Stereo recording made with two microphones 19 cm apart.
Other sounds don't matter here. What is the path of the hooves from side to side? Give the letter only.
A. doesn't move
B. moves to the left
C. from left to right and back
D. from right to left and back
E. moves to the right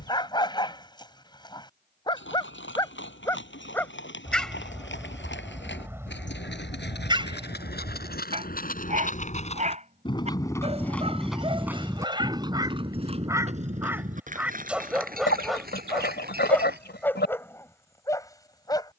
E.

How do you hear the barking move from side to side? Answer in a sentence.
You can hear the barking go right and come back.